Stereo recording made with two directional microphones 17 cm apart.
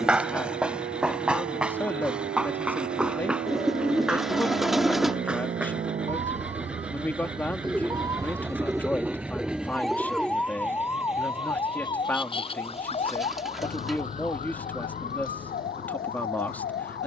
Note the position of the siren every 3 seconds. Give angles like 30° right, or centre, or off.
60° right, 50° right, 30° right, 10° left, 40° left, 50° left.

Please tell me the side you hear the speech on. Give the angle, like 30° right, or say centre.
10° left.